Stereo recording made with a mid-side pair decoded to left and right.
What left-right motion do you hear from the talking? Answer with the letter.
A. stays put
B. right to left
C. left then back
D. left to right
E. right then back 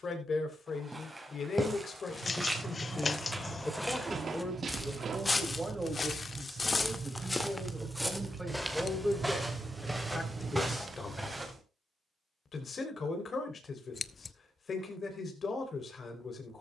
E.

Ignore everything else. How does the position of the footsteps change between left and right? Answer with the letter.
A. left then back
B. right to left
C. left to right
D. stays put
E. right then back
A.